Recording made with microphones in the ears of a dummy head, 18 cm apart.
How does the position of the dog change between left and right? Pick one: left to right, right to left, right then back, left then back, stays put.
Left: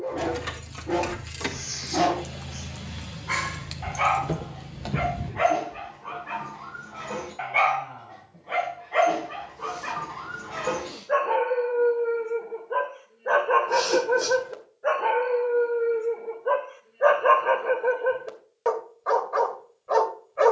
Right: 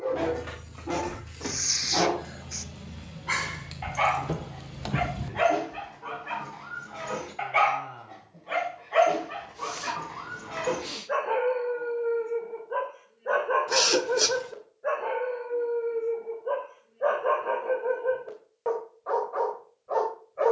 right to left.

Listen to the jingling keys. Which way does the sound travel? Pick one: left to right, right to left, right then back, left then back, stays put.
left to right.